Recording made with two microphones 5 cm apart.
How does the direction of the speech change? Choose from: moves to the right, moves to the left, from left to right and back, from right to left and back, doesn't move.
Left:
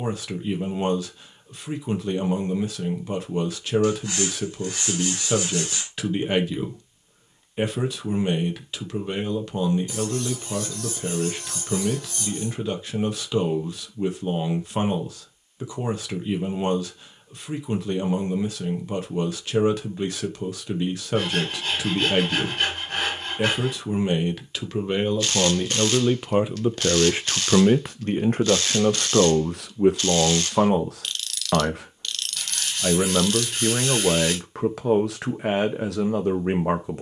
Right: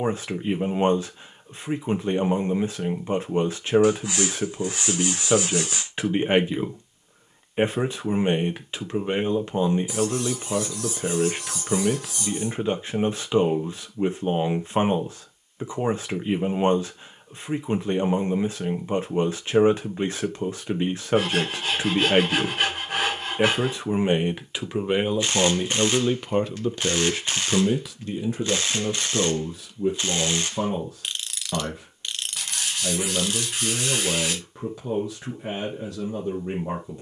moves to the left.